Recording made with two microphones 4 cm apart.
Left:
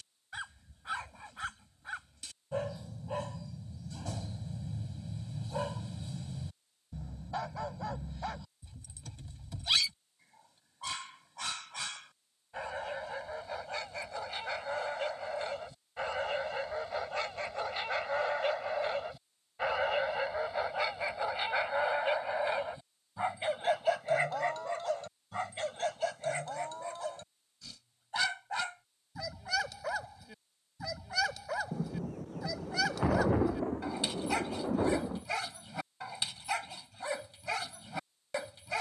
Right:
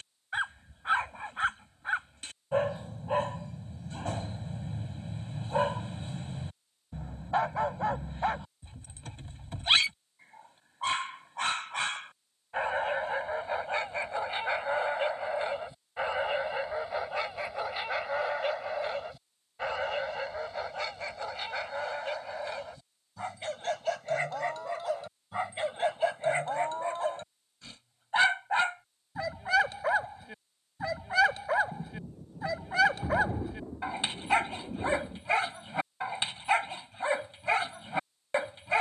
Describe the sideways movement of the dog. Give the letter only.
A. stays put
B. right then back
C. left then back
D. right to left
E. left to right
C.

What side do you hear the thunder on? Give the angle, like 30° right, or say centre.
80° left.